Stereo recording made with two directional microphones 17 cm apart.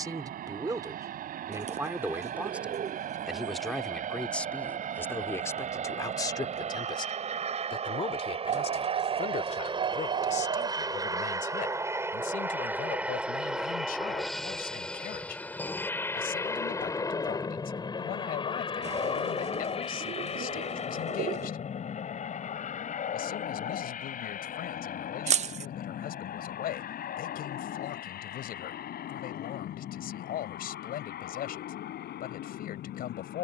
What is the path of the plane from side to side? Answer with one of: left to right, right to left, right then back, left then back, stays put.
right to left.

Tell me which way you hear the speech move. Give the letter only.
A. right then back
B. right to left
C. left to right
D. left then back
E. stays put
B.